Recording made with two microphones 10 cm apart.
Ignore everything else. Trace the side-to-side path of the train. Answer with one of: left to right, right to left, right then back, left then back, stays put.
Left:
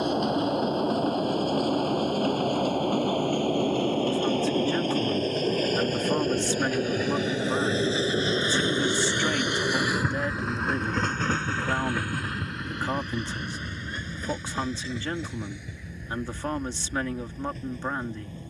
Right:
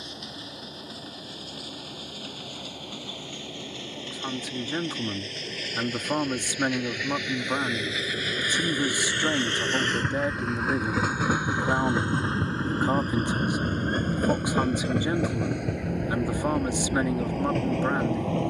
left to right.